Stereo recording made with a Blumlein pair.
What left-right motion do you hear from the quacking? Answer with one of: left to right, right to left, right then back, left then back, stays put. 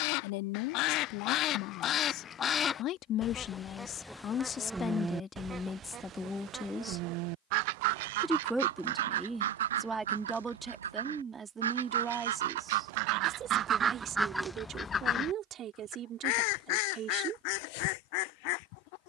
right then back.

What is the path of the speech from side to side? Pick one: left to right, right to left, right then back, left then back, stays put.
left to right.